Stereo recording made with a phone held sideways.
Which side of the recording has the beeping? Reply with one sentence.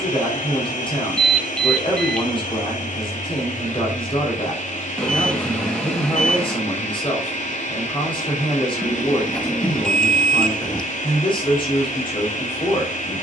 In this clip you hear the beeping in the centre.